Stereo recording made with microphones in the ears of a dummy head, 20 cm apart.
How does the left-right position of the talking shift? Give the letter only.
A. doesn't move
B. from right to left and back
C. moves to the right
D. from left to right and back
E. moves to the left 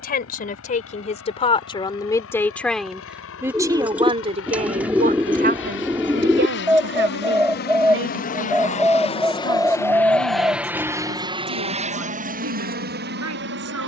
C.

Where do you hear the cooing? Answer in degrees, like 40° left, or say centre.
10° right.